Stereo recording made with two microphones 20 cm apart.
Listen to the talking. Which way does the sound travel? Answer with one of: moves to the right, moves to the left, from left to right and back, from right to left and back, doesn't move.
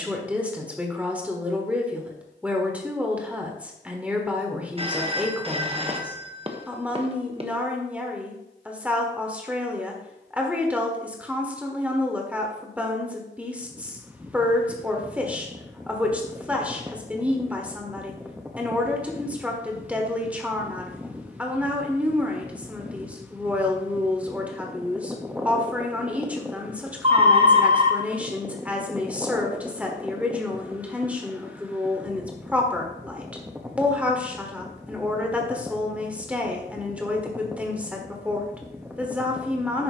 doesn't move.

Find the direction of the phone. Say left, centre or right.
right.